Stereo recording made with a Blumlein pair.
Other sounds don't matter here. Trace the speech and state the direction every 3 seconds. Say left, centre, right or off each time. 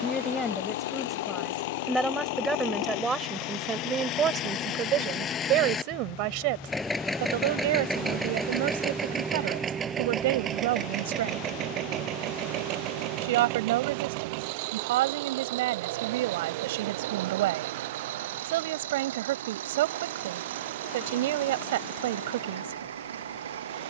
centre, right, right, right, right, right, right, right.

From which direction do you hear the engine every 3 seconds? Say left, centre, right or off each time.
left, left, centre, right, right, right, right, right.